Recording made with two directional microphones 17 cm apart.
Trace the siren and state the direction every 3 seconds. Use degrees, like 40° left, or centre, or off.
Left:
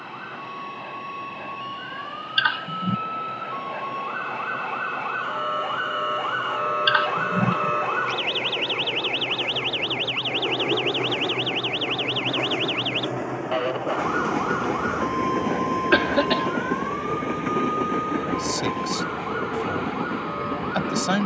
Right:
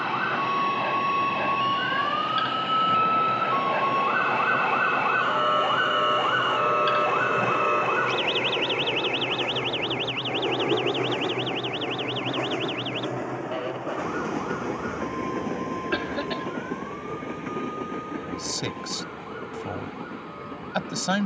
60° right, 30° right, centre, 30° left, 40° left, 50° left, 60° left.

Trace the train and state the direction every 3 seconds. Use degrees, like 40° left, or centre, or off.
50° right, 40° right, 20° right, 10° right, 10° left, 30° left, 50° left.